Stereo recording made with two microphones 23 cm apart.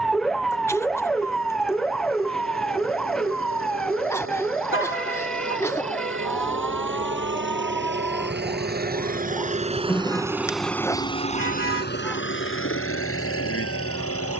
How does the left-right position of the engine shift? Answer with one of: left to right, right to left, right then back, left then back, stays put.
right to left.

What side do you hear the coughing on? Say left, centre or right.
centre.